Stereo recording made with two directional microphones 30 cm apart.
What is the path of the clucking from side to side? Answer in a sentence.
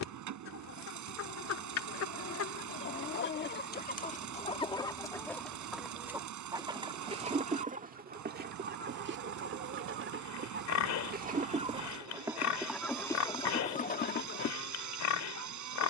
You can hear the clucking move from left to right and back again.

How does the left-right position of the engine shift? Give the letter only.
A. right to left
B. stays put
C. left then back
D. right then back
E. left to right
B.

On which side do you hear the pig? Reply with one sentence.
In this clip you hear the pig on the left.